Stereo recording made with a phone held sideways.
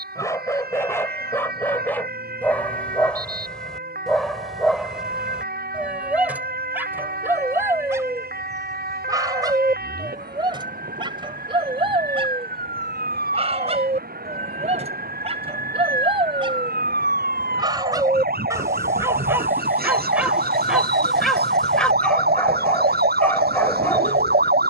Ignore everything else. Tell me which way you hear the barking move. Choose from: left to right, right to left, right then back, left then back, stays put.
right then back.